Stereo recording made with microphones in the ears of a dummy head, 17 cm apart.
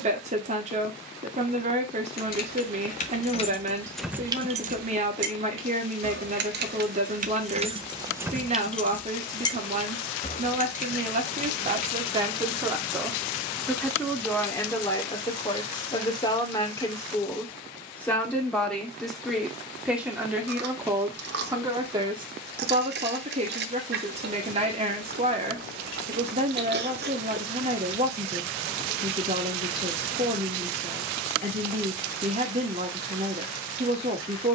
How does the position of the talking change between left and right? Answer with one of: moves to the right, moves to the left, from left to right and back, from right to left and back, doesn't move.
from right to left and back.